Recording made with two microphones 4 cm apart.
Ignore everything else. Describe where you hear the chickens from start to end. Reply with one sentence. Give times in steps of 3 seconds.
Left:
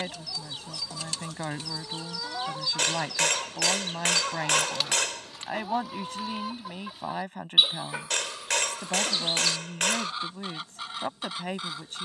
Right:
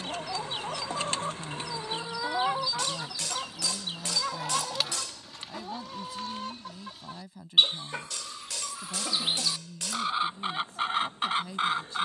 In this clip you hear the chickens on the right from 0 s, in the centre from 3 s and on the right from 9 s.